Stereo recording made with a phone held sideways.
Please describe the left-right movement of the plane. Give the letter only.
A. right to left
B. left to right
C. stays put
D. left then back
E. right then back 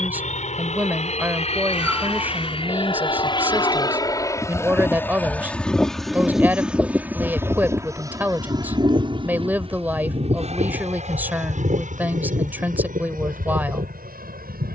B.